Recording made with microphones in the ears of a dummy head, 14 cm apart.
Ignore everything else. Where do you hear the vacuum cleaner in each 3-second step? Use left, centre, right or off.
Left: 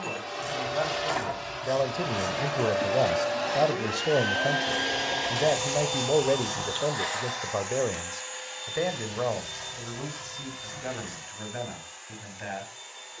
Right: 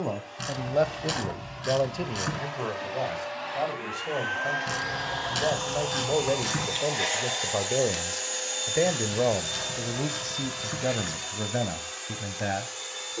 left, left, right, right, right.